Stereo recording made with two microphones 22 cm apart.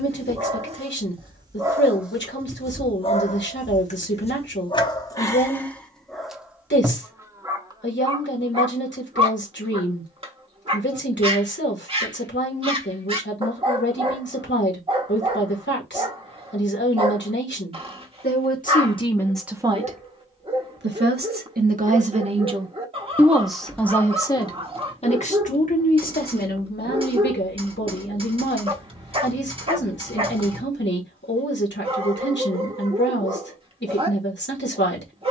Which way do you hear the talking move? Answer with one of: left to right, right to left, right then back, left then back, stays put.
right then back.